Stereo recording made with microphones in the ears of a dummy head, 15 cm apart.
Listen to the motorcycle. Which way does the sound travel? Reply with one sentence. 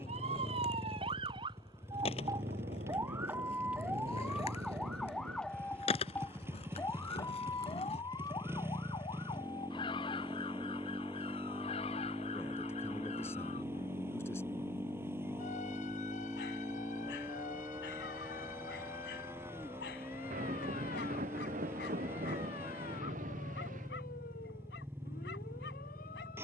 In this clip you hear the motorcycle stay in one place.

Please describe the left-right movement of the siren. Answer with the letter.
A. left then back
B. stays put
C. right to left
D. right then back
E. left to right
C.